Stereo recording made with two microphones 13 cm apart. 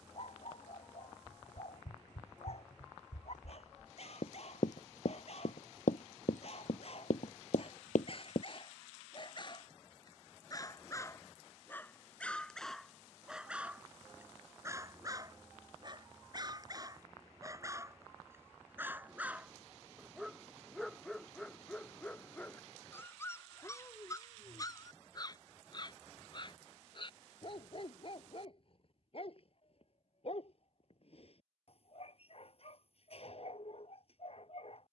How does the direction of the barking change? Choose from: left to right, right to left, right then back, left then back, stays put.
right then back.